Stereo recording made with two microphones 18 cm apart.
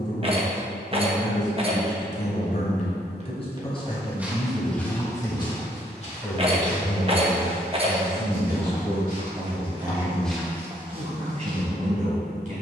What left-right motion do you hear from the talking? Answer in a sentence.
You can hear the talking move to the right.